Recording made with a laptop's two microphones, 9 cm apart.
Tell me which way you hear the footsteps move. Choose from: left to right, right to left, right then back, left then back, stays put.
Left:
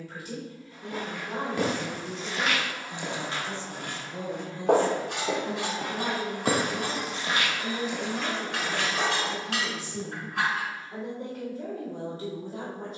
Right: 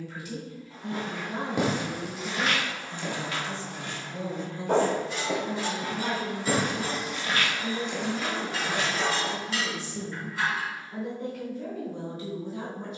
left then back.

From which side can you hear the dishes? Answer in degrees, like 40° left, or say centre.
70° left.